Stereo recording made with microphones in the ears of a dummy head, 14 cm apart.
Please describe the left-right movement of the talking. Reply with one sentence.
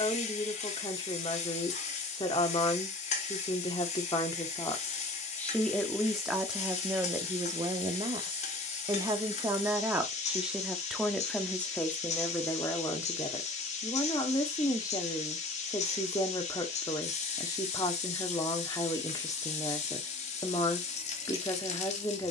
You can hear the talking move from left to right and back again.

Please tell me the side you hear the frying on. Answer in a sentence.
In this clip you hear the frying on the left.